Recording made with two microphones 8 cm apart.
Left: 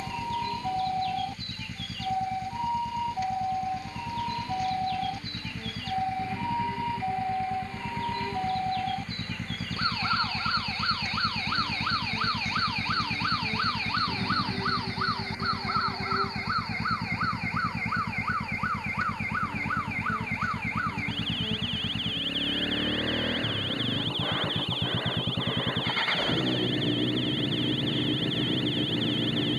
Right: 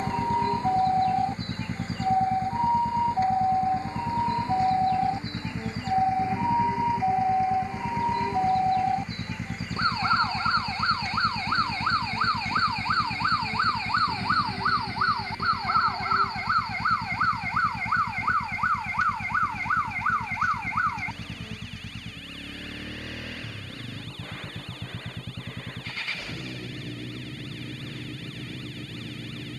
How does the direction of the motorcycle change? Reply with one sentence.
You can hear the motorcycle travel towards the left.